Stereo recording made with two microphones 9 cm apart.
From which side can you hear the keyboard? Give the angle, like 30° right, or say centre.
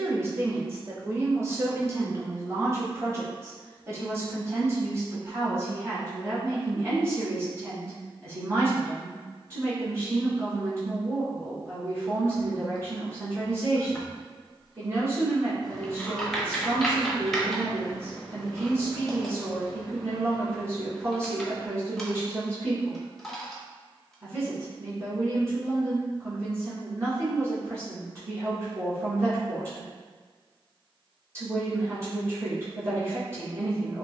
centre.